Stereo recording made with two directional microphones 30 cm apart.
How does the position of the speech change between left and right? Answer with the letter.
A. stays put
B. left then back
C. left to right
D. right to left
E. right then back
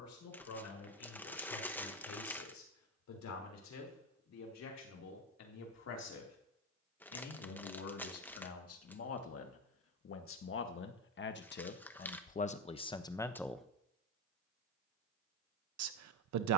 C.